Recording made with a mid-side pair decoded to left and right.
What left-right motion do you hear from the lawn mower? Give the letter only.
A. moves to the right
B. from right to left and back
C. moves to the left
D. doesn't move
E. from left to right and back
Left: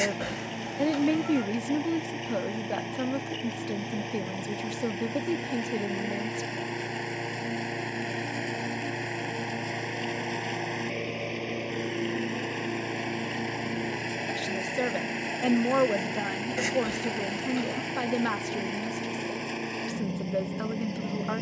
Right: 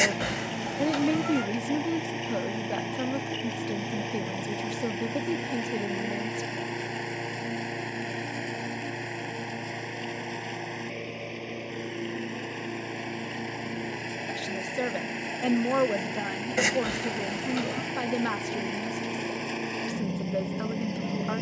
B.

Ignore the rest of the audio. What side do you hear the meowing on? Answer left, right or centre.
right.